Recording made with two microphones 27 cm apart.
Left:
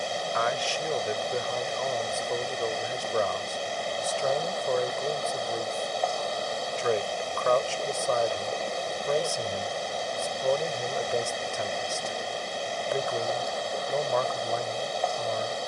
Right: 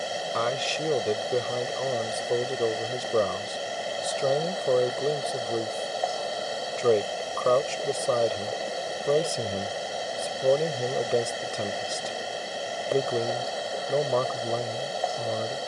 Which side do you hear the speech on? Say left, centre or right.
right.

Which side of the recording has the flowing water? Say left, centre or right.
centre.